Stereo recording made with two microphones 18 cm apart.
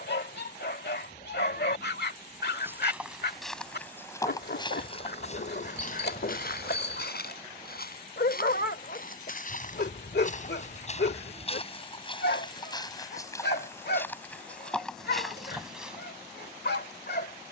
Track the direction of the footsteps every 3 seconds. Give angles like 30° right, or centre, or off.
10° right, 20° left, 60° left, 40° left, 20° left, centre.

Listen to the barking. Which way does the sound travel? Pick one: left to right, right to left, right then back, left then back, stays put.
stays put.